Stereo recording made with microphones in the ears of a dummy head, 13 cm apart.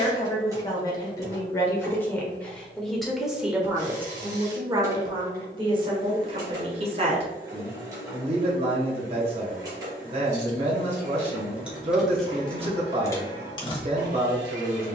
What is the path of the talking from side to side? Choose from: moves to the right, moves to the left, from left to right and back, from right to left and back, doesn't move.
moves to the right.